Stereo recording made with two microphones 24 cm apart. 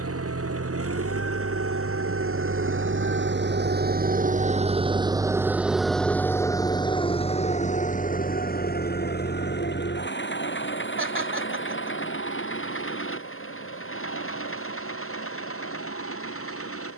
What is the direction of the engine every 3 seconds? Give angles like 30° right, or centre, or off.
70° right, 30° right, 30° left, 50° left, 60° left, 60° left.